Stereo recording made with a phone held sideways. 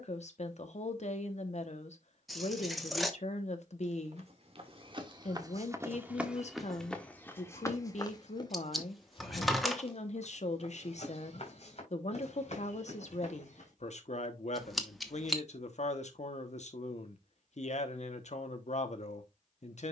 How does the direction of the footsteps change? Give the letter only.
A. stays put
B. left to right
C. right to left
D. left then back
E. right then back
C.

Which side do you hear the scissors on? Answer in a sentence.
In this clip you hear the scissors in the centre.